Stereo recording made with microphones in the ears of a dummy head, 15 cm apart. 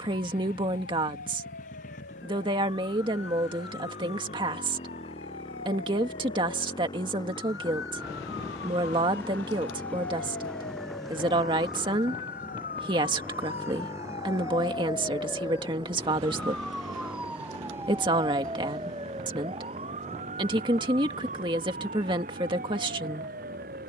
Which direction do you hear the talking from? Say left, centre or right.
right.